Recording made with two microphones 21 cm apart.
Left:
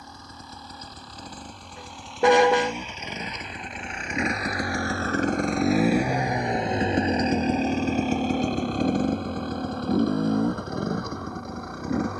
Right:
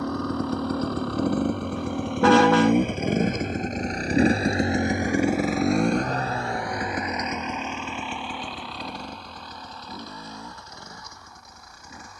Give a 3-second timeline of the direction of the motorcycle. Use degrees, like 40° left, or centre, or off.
70° right, 30° right, 30° left, 60° left.